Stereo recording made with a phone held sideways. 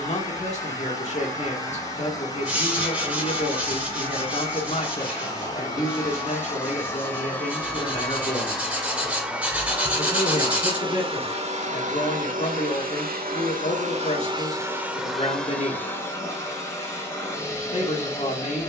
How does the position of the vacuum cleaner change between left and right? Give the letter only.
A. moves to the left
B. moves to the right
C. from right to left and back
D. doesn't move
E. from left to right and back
E.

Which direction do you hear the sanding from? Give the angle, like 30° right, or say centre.
10° right.